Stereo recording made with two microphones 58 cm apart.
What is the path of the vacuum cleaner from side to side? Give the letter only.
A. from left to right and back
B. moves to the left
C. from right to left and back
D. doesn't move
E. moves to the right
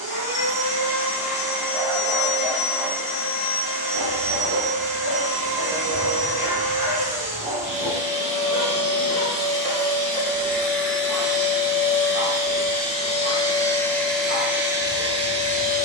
E.